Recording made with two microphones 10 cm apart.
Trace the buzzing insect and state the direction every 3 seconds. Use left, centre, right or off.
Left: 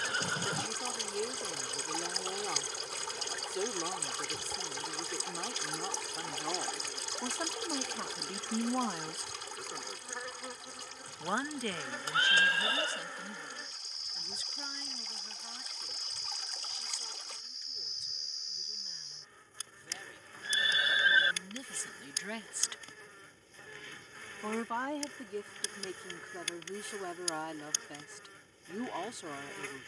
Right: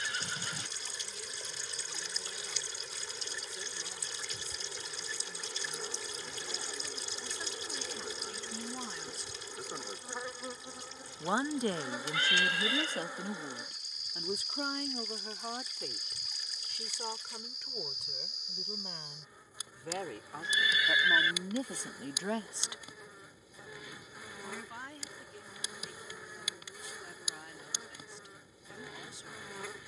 left, centre, centre, centre, centre, centre, centre, centre, centre, centre.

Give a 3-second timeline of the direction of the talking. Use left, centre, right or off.
left, left, left, centre, right, right, right, right, left, left.